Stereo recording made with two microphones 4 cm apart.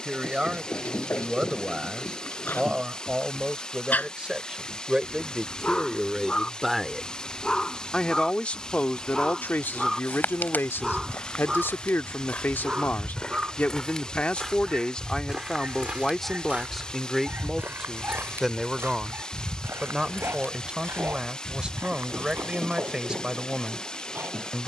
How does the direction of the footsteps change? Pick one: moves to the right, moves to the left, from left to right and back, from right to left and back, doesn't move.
moves to the right.